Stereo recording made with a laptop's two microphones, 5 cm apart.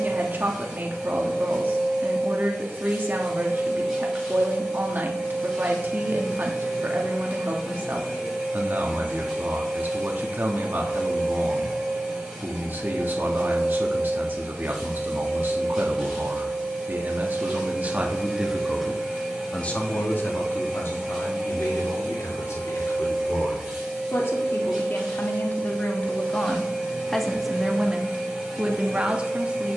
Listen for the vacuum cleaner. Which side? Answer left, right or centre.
centre.